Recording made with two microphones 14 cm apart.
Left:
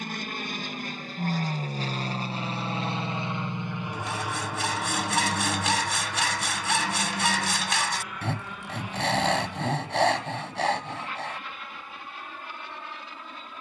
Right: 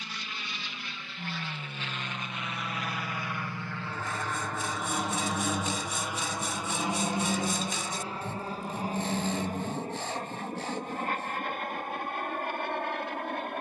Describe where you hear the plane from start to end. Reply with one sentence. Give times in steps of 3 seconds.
In this clip you hear the plane on the left from 0 s, in the centre from 3 s and on the right from 6 s.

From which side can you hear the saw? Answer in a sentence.
You can hear the saw on the left.